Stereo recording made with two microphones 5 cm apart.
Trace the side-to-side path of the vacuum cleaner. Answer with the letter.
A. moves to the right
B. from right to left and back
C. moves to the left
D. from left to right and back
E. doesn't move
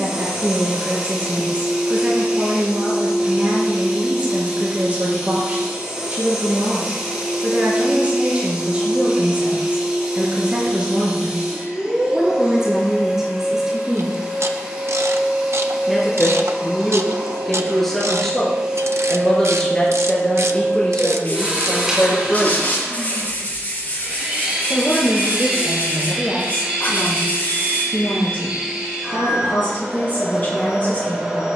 E.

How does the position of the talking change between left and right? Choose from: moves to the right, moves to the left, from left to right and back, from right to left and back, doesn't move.
moves to the left.